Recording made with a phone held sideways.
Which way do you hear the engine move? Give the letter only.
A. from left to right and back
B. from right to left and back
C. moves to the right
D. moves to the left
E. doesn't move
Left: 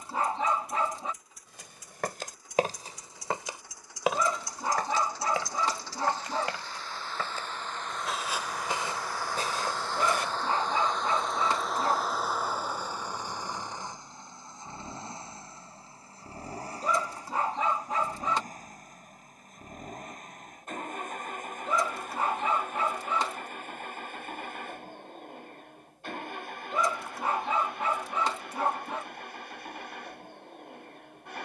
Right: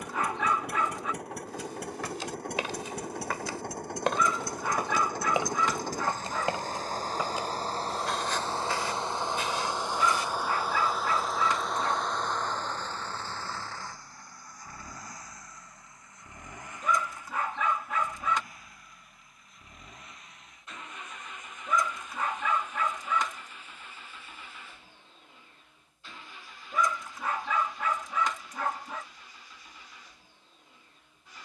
D.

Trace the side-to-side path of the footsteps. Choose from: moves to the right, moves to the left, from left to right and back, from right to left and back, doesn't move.
from left to right and back.